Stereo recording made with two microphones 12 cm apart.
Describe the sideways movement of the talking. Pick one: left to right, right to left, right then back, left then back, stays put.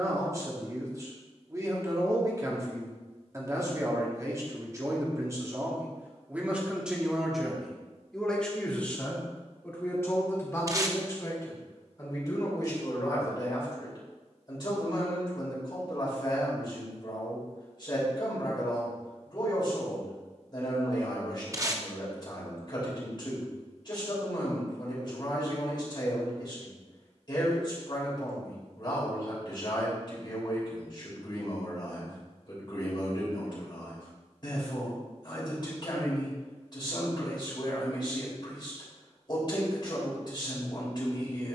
right to left.